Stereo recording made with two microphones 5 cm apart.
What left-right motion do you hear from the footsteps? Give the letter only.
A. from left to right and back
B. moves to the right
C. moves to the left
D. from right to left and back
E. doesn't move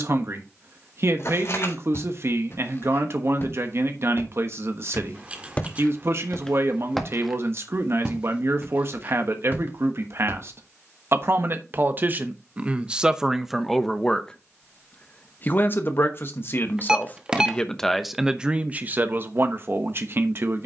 B.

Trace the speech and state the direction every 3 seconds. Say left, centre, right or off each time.
right, right, right, right, centre, left, right.